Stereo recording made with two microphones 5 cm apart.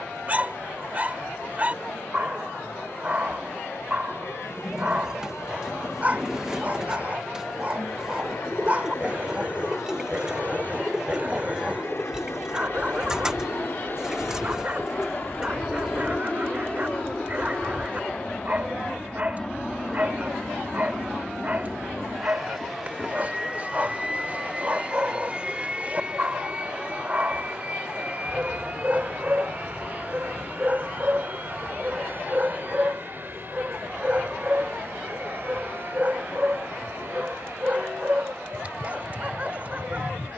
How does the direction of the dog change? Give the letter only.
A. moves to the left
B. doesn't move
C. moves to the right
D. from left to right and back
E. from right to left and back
B.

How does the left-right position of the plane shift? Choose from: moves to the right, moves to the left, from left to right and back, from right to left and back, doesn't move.
moves to the right.